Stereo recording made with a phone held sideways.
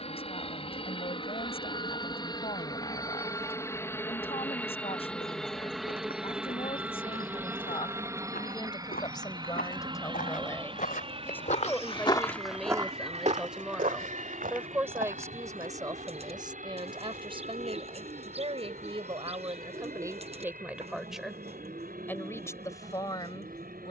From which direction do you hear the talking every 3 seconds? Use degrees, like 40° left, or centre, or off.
40° left, 40° left, 40° left, 20° left, centre, 30° right, 30° right, 20° left.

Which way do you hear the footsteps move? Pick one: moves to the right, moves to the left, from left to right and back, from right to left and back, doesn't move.
moves to the right.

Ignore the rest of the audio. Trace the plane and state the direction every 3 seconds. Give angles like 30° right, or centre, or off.
30° left, 10° left, 10° right, 30° right, 40° right, 50° right, 60° right, 60° right.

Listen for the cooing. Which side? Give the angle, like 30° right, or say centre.
40° right.